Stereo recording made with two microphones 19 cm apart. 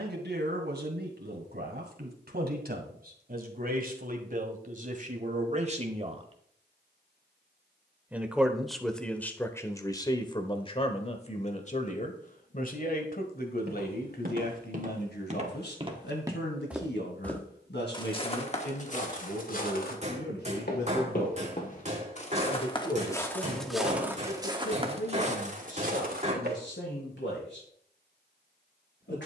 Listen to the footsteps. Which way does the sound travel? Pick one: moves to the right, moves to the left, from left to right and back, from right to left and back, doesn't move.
from right to left and back.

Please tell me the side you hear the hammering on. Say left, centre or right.
right.